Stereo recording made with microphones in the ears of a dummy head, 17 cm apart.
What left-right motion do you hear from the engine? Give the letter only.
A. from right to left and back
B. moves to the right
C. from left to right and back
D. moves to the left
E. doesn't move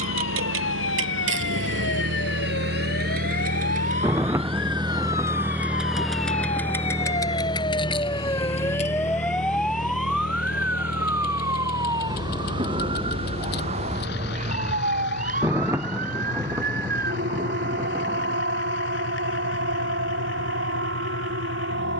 D.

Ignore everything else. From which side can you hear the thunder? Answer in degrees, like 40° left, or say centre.
10° right.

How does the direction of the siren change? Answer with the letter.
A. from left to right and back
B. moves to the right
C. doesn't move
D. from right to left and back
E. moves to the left
B.